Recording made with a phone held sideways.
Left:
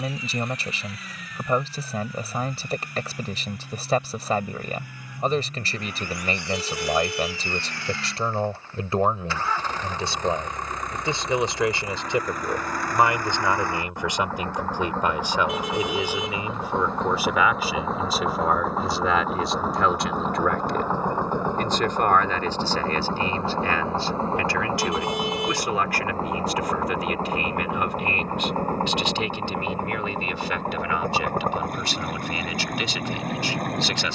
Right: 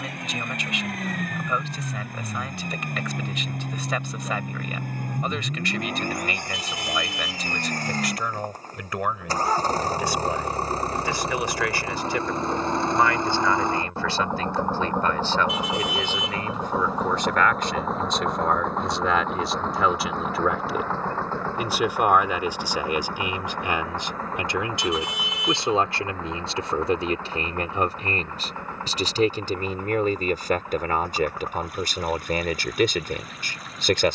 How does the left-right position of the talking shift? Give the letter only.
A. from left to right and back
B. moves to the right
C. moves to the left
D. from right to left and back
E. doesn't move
B.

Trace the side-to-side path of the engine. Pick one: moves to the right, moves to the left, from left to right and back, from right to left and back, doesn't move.
moves to the left.